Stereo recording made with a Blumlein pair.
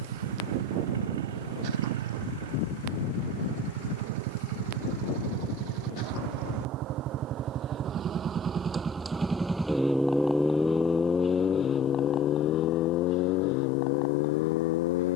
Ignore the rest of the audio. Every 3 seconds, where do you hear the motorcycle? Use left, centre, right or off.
right, right, right, centre, left.